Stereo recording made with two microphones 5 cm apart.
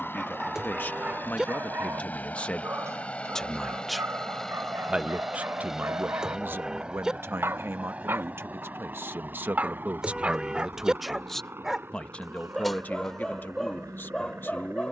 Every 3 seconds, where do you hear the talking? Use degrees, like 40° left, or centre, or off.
40° left, 20° right, 60° right, 20° right, 40° left.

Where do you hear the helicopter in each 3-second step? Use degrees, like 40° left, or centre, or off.
40° left, 10° left, 20° right, 40° right, 50° right.